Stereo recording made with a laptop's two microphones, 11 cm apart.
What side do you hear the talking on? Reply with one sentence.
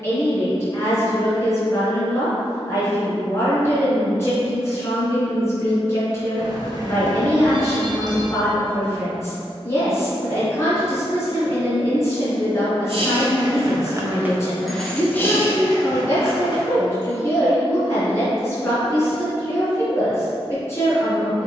In this clip you hear the talking on the left.